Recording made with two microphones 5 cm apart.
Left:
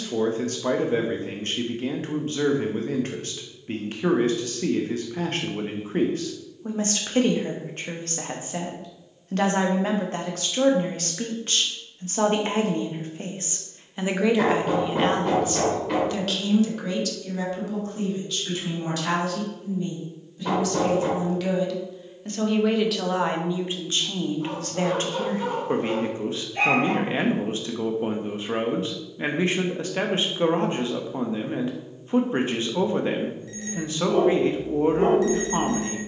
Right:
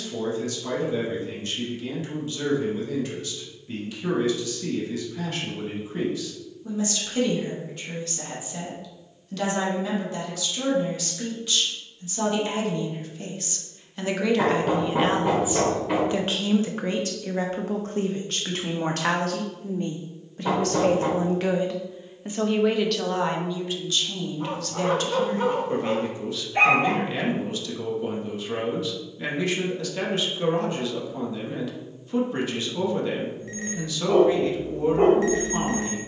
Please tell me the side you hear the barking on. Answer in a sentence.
In this clip you hear the barking on the right.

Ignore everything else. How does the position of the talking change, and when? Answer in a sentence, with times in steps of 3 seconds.
In this clip you hear the talking on the left from 0 s, on the right from 15 s, in the centre from 21 s and on the left from 24 s.